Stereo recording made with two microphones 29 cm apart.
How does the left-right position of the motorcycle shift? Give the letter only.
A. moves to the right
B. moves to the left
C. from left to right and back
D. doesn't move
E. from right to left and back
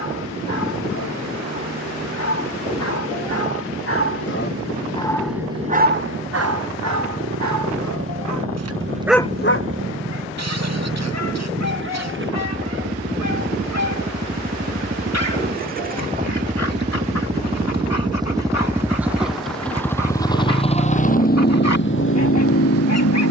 B.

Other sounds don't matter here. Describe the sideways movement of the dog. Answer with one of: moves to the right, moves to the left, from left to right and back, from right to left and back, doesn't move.
from left to right and back.